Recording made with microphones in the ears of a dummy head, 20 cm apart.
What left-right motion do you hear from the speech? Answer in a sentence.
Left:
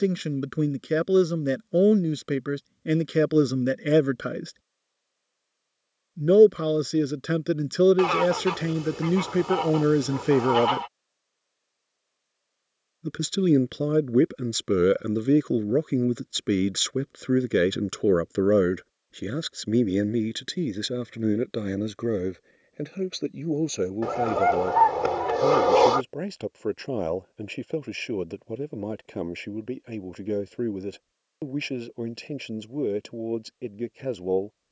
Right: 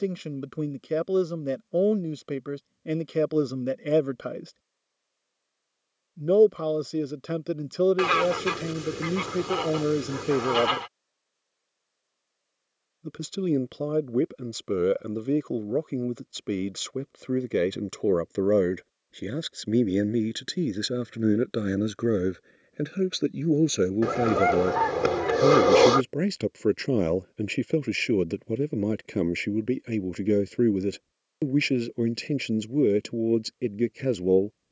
You can hear the speech move to the right.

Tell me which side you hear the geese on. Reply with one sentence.
You can hear the geese on the right.